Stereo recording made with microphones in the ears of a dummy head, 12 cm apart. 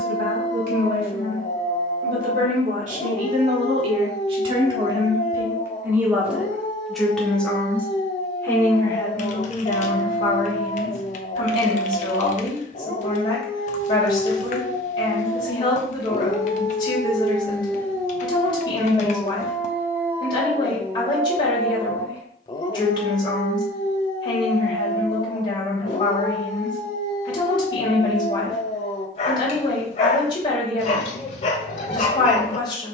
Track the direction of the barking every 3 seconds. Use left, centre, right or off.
left, left, left, left, left, left, centre, left, left, left, left.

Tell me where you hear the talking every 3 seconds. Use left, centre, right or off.
right, right, centre, left, left, left, left, left, left, left, left.